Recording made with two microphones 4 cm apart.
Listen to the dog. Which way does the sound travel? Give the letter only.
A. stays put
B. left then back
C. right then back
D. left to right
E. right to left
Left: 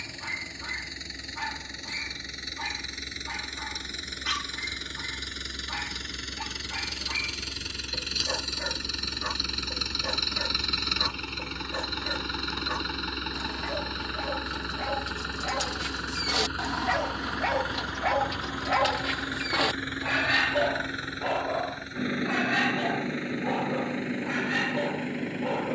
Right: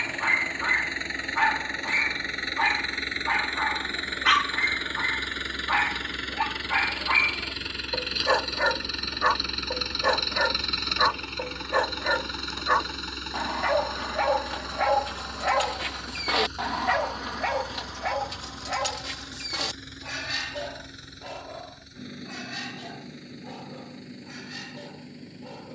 E.